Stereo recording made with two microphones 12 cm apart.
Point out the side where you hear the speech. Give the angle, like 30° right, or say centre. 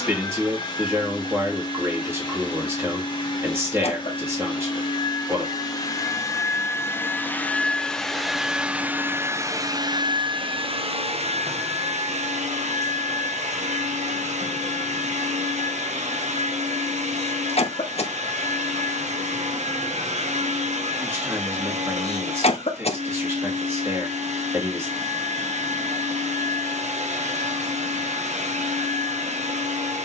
20° right.